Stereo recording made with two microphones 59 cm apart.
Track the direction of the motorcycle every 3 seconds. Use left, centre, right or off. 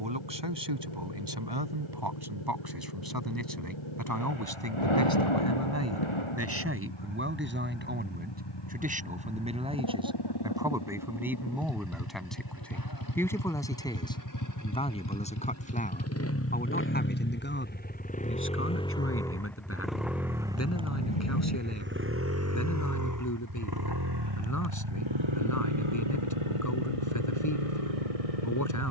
left, left, left, left, left, left, centre, right, right, right.